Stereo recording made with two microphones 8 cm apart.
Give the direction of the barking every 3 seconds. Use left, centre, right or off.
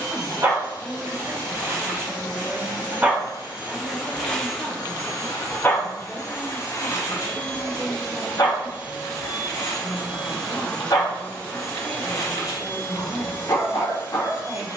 right, centre, left, left, left.